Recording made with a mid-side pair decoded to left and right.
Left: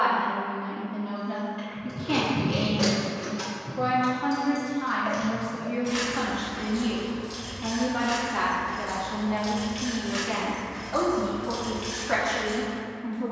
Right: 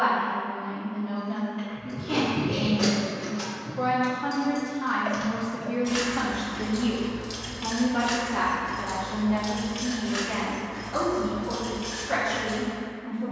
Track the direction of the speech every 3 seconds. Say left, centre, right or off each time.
left, centre, centre, left, left.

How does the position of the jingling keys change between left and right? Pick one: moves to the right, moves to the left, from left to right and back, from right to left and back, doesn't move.
from left to right and back.